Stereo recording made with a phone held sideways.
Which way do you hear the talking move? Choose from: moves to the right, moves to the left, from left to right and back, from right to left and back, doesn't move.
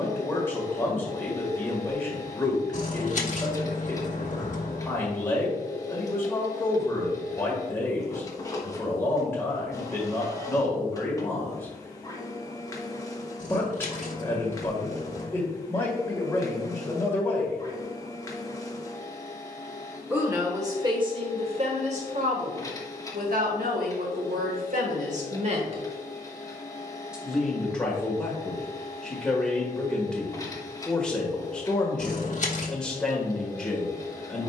from left to right and back.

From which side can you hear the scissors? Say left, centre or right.
left.